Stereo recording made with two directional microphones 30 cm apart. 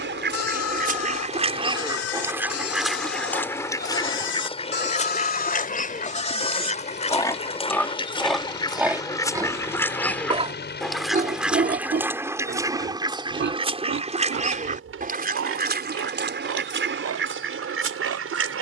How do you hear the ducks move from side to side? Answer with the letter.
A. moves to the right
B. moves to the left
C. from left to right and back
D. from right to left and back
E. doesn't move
D.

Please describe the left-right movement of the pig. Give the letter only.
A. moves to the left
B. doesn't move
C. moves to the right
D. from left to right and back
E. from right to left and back
C.